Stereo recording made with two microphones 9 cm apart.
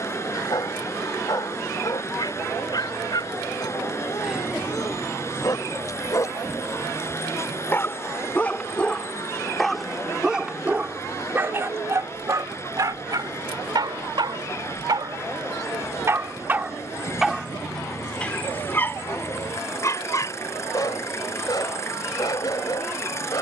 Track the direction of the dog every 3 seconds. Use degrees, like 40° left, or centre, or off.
50° left, 50° left, 20° left, 10° right, 50° right, 20° right, 30° left, 50° left.